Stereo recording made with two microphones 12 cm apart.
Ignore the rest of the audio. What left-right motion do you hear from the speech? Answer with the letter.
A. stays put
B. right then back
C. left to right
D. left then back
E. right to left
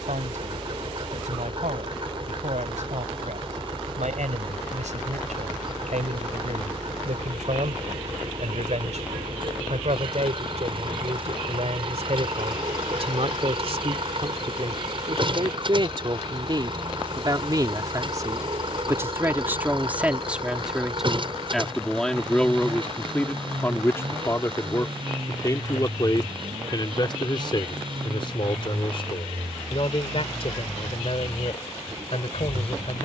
E.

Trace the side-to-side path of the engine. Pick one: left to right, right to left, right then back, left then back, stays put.
stays put.